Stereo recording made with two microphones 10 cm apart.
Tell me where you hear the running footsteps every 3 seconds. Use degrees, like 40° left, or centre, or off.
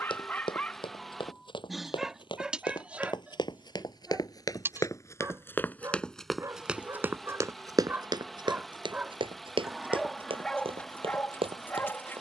60° left, 40° left, 30° right, 70° right.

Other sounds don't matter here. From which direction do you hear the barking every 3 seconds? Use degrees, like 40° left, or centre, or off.
centre, 20° right, 20° right, 10° left.